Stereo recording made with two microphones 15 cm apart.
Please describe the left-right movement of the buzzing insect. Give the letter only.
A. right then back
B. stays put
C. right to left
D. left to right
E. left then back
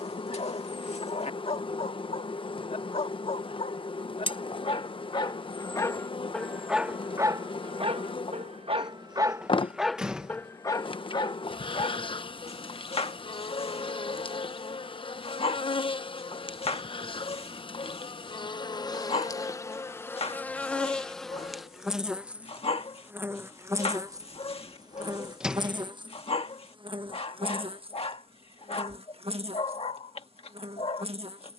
D.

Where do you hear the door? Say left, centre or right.
centre.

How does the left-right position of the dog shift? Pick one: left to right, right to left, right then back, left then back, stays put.
right then back.